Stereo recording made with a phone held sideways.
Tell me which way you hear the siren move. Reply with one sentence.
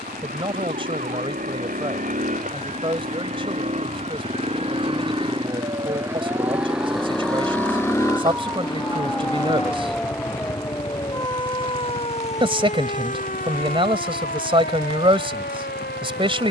In this clip you hear the siren move from right to left.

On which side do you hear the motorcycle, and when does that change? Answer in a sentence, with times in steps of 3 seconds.
You can hear the motorcycle on the right from 0 s, in the centre from 6 s and on the left from 9 s.